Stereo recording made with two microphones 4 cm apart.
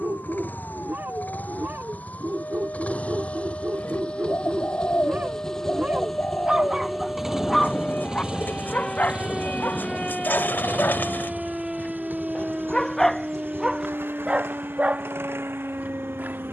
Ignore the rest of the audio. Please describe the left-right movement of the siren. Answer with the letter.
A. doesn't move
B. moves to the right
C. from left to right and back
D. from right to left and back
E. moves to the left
B.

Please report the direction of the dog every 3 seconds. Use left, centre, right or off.
right, right, centre, left, centre, right.